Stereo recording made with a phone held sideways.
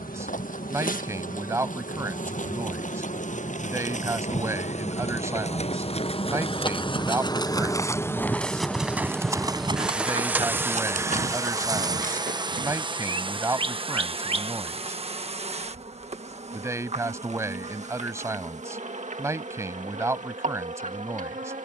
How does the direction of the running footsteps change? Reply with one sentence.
In this clip you hear the running footsteps travel towards the right.